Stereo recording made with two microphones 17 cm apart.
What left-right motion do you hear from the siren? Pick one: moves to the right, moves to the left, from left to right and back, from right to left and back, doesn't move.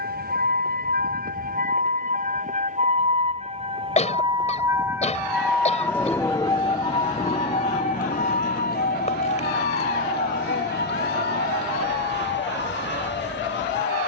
moves to the left.